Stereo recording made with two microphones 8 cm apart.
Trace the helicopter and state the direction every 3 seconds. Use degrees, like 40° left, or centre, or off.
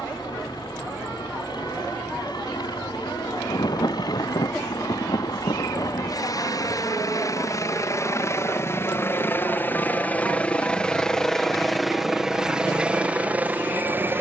70° left, 60° left, 40° left, 10° left, 20° right.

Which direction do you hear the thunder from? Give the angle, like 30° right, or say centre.
60° left.